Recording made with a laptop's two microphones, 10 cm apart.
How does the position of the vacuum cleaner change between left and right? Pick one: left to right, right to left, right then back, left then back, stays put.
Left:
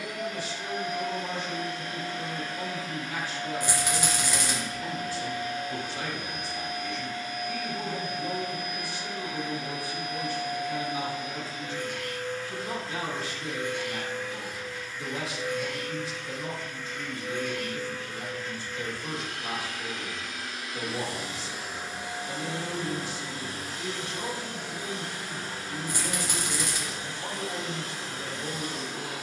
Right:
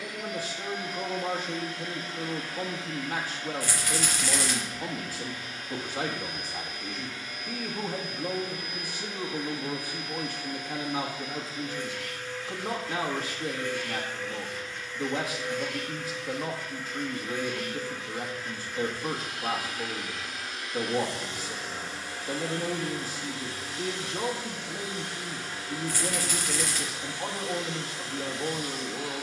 right then back.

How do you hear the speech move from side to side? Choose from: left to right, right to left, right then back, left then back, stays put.
stays put.